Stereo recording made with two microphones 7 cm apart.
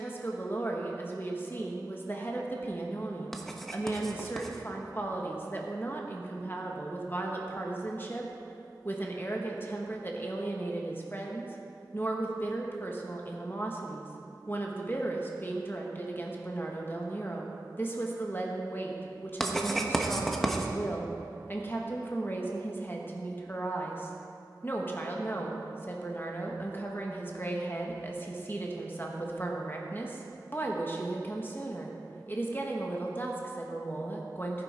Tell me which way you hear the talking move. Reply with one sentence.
You can hear the talking stay put.